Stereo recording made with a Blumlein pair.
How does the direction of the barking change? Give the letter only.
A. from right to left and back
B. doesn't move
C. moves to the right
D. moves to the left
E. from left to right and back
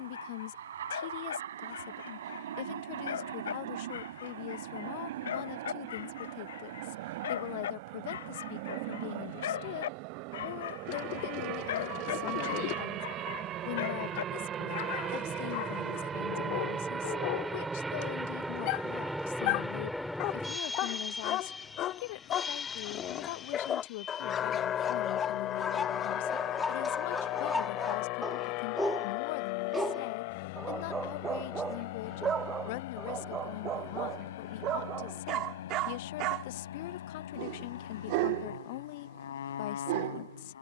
C.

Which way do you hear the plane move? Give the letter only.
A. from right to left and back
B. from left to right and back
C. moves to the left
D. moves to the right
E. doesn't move
C.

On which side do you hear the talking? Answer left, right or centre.
left.